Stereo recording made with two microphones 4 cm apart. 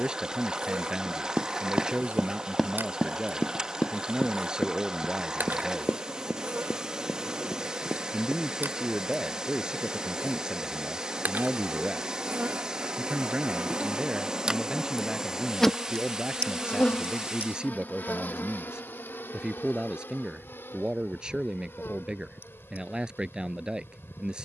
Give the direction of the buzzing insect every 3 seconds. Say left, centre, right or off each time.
right, right, right, right, right, left, left, left.